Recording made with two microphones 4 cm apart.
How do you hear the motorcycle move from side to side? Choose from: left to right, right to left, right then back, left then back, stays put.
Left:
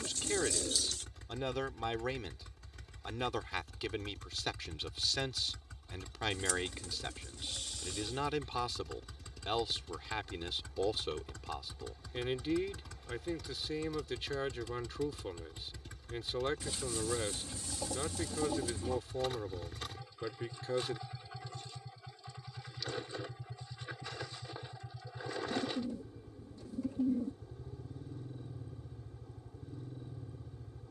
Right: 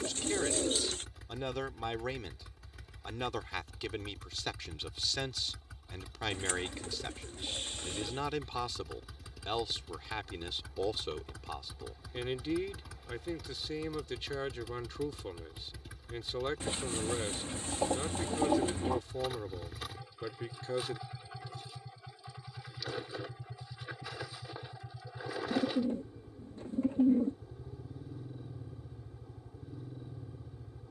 stays put.